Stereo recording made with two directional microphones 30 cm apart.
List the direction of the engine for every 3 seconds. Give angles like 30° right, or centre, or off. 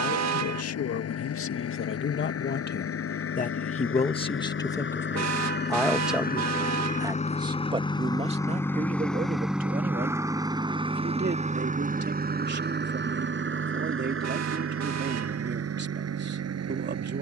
60° left, 40° left, 20° left, 10° right, 40° right, 60° right.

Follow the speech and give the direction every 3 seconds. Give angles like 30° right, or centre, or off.
50° left, 10° left, 20° right, 30° right, 40° right, 40° right.